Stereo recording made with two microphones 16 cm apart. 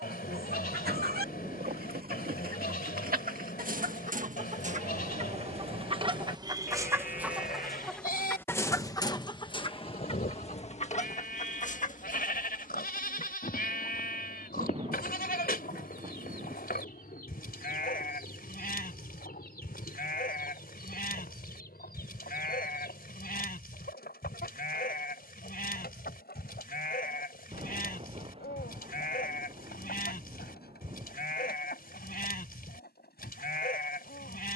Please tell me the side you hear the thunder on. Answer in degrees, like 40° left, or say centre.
30° right.